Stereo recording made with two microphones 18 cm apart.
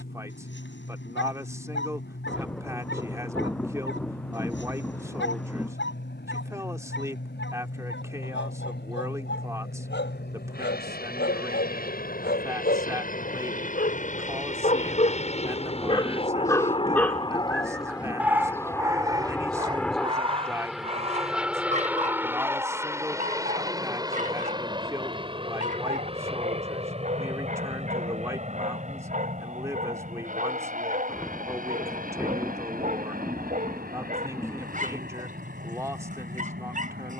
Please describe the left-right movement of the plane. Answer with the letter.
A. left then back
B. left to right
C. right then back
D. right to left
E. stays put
B.